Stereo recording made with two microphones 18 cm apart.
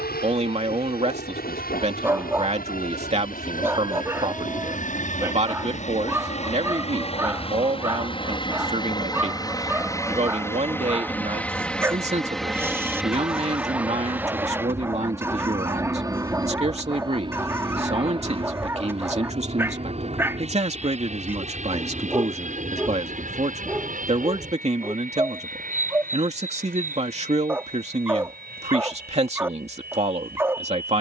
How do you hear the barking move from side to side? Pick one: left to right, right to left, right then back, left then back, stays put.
stays put.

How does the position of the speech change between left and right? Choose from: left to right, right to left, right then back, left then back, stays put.
stays put.